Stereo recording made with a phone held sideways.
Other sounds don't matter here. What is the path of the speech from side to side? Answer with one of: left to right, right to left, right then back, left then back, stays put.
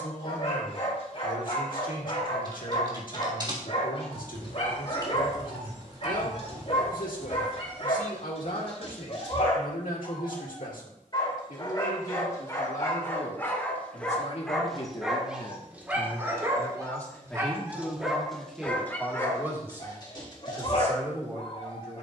left to right.